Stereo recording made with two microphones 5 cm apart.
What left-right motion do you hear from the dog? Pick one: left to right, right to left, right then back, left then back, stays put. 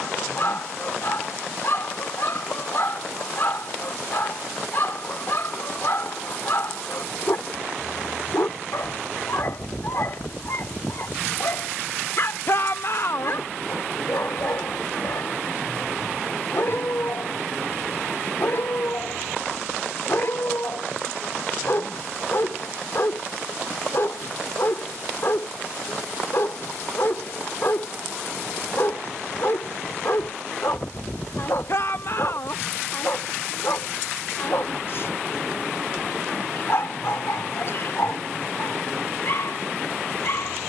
stays put.